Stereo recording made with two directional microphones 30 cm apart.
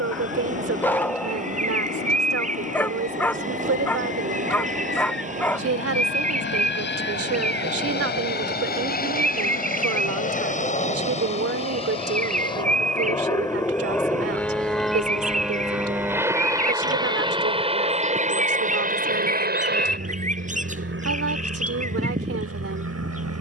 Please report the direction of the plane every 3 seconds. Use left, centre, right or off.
left, left, left, left, centre, centre, right, right.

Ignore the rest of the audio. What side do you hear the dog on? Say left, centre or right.
centre.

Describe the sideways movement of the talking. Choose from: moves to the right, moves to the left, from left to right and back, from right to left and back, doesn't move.
doesn't move.